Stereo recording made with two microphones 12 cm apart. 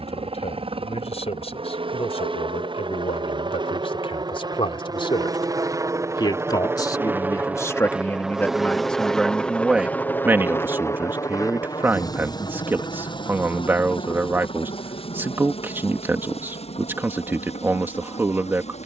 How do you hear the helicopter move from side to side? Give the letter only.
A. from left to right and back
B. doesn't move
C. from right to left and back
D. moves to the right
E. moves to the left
E.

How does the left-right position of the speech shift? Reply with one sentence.
You can hear the speech travel towards the right.